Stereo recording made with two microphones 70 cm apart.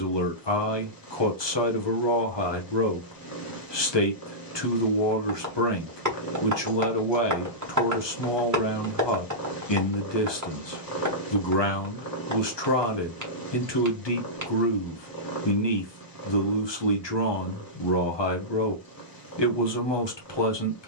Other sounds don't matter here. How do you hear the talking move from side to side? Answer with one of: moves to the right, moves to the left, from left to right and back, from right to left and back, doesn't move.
doesn't move.